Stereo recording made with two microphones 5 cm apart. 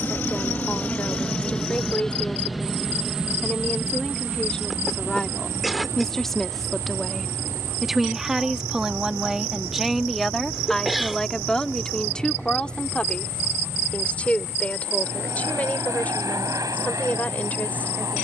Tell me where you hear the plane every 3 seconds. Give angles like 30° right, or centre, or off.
20° left, 30° right, 60° right, 70° right, 70° right, 80° right.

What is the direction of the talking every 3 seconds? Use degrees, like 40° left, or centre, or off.
30° left, 20° left, centre, centre, 20° left, 30° left.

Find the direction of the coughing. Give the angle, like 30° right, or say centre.
centre.